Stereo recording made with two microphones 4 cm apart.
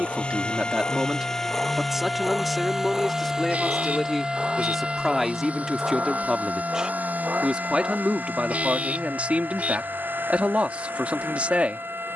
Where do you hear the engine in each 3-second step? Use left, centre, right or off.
centre, right, right, right.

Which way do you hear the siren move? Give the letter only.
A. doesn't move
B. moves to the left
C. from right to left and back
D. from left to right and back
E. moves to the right
E.